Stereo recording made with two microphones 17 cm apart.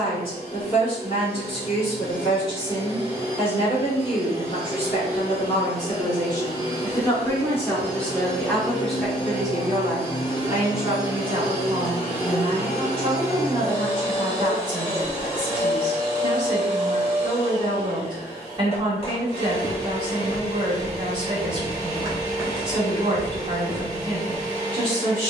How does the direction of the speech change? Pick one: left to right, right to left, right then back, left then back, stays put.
left to right.